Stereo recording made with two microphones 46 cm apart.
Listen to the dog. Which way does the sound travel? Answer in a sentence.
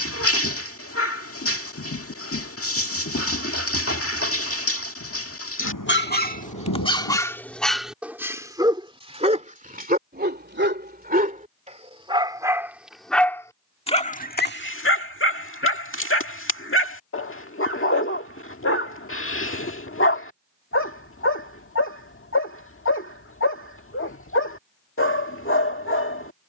In this clip you hear the dog move from left to right and back again.